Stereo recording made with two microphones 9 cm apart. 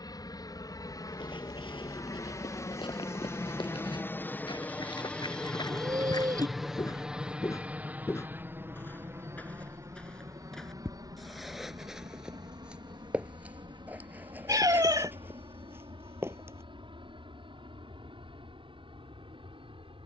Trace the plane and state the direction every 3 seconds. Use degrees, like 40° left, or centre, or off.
40° left, 20° left, 10° right, 40° right, 50° right, 60° right, 70° right.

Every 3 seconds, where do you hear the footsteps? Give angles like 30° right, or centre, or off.
80° left, 60° left, 40° left, 10° left, 20° right, 30° right, off.